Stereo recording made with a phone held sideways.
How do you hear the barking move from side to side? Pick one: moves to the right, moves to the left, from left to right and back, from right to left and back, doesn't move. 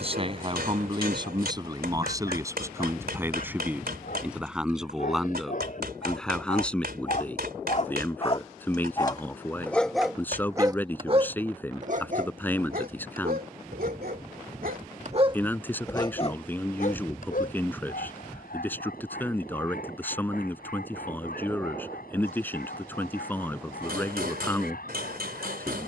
from left to right and back.